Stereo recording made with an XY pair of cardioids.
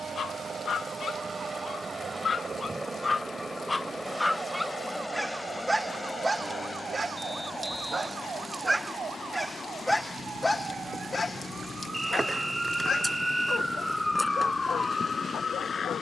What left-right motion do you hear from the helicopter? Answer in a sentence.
In this clip you hear the helicopter move to the left.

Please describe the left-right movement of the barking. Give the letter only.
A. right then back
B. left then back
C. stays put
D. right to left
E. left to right
A.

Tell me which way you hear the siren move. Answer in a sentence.
You can hear the siren travel towards the left.